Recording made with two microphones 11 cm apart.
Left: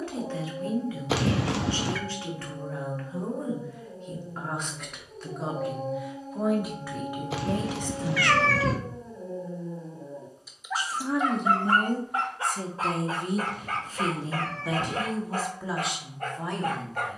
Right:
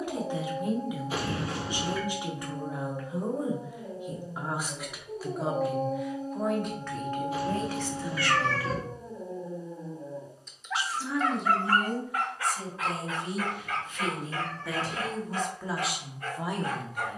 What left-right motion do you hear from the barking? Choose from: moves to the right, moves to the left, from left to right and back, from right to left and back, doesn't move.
moves to the left.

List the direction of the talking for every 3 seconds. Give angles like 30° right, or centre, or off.
20° right, 10° right, 10° left, 40° left, 40° left, centre.